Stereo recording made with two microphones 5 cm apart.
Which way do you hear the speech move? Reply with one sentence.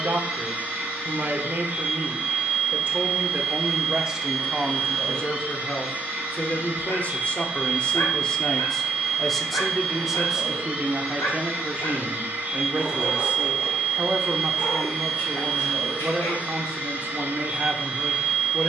You can hear the speech go left and come back.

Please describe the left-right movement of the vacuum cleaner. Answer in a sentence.
You can hear the vacuum cleaner stay put.